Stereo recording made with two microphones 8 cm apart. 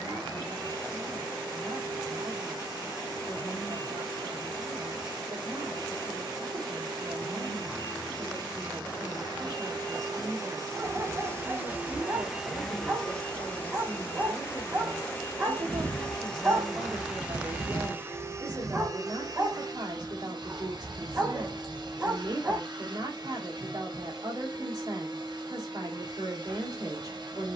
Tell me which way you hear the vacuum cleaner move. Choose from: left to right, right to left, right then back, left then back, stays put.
left then back.